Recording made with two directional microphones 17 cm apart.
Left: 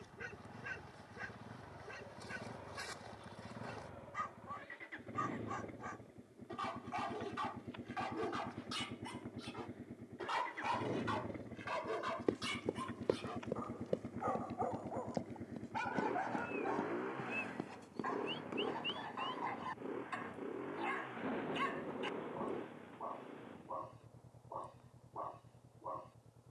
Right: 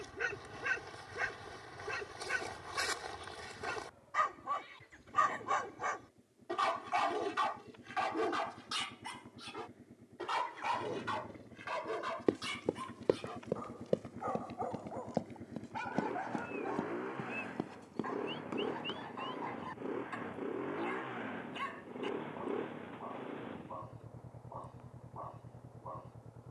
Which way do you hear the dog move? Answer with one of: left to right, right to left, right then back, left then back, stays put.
right to left.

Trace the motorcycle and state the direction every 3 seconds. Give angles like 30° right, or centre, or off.
60° left, 50° left, 50° left, 40° left, 20° left, centre, 20° right, 40° right, 50° right.